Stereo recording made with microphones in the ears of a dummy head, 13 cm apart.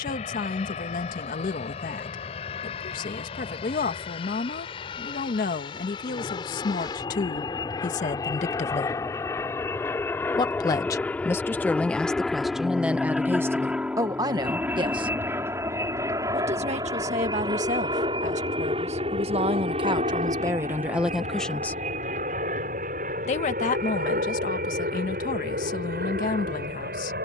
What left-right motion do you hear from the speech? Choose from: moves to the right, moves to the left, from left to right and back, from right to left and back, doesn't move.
from left to right and back.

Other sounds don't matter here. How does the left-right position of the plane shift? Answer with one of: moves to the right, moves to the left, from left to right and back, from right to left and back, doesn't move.
moves to the right.